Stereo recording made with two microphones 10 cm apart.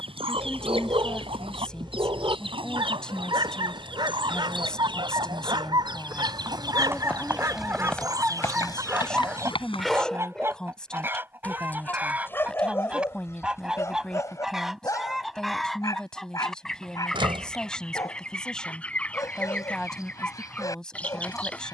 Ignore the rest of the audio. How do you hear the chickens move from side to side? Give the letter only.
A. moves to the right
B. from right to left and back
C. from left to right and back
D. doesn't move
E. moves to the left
E.